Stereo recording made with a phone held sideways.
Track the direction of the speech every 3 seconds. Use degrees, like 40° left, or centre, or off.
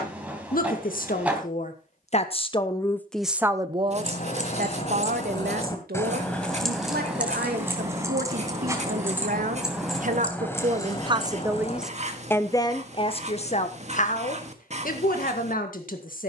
50° left, 50° right, 70° right, 40° right, 40° left, 60° left.